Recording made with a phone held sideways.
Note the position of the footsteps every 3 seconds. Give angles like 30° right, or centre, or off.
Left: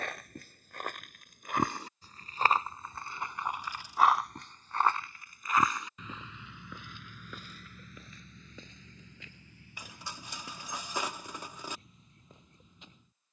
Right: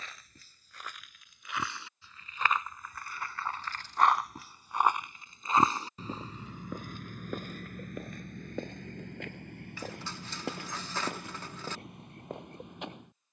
50° left, centre, 50° right, 70° right, 70° right.